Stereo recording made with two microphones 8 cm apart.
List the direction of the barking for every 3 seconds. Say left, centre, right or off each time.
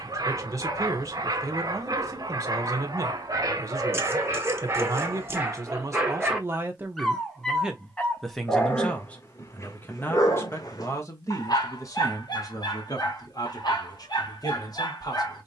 right, right, centre, left, left.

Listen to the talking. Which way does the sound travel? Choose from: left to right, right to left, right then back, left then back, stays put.
right to left.